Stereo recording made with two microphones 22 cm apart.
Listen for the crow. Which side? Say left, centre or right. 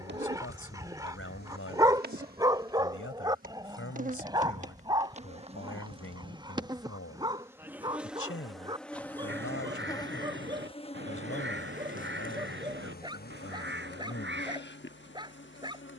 right.